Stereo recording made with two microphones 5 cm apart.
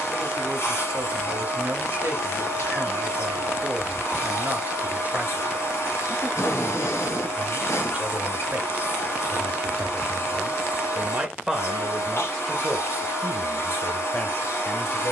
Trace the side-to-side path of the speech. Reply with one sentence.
You can hear the speech move from right to left.